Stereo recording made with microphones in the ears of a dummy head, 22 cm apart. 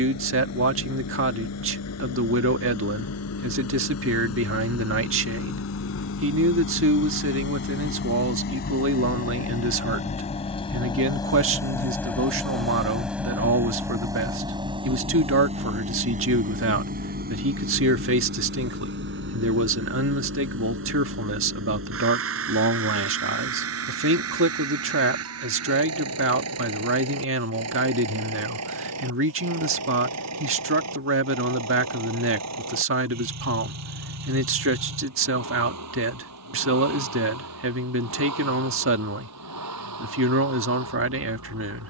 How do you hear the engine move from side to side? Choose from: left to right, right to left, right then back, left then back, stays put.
left to right.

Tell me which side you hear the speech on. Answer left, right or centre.
right.